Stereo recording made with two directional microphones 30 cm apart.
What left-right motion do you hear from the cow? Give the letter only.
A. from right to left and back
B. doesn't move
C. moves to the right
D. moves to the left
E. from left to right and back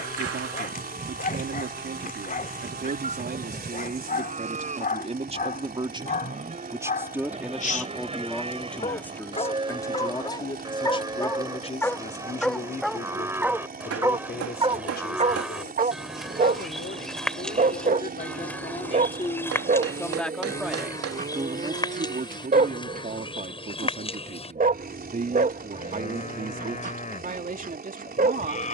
D.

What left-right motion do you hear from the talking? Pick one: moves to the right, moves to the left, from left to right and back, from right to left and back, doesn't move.
from right to left and back.